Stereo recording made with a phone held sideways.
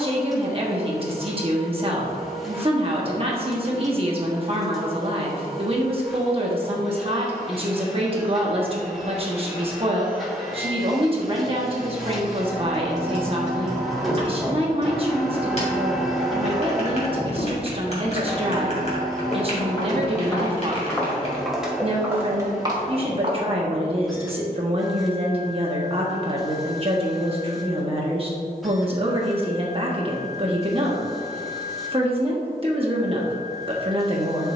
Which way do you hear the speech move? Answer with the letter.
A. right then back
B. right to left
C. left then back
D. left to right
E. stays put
E.